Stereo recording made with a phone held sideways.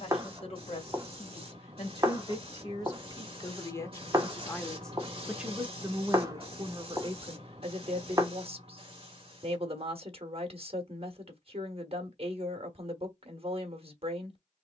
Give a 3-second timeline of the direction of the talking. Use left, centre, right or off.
left, centre, right, right, right.